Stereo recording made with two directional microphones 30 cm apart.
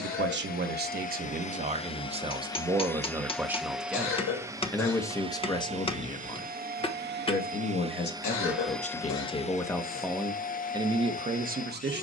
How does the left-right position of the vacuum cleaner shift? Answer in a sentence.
You can hear the vacuum cleaner go right and come back.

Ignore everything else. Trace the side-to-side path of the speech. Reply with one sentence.
In this clip you hear the speech go left and come back.